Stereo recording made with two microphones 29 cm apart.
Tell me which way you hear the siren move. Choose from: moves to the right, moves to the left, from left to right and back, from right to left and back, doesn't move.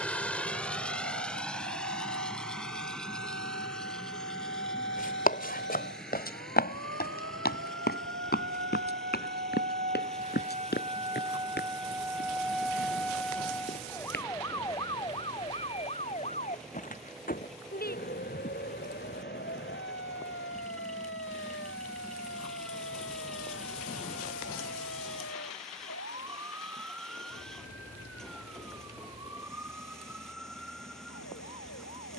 moves to the left.